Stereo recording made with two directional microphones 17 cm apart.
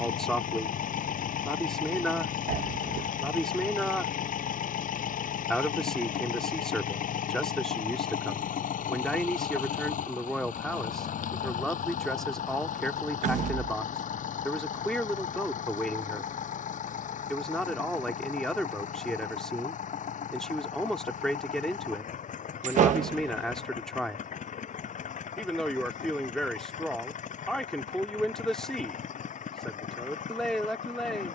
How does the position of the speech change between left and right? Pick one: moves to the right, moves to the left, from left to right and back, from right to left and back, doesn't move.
doesn't move.